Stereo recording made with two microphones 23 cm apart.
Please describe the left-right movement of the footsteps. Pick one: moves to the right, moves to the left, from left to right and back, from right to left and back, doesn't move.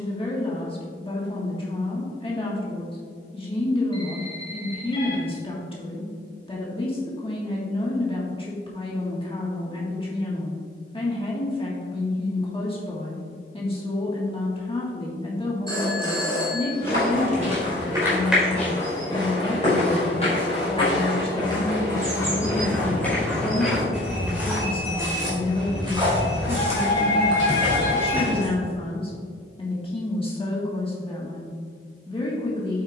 from right to left and back.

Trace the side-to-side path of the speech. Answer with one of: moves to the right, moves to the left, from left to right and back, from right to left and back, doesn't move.
doesn't move.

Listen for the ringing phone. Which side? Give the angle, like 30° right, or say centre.
20° left.